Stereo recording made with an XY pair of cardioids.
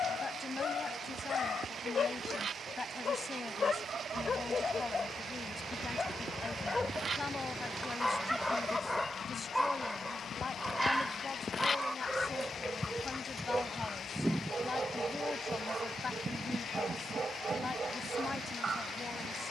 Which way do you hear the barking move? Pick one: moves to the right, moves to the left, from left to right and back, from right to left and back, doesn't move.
moves to the right.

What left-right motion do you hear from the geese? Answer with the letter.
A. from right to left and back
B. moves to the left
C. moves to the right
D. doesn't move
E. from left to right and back
A.